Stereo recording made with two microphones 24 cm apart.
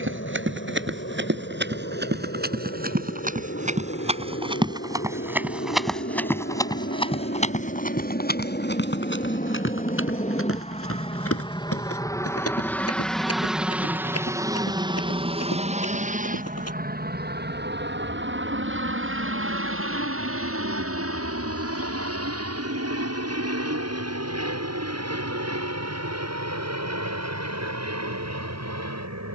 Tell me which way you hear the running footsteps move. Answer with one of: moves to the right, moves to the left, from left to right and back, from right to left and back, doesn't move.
moves to the left.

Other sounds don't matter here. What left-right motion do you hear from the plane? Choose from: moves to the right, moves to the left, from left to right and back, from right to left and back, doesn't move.
moves to the right.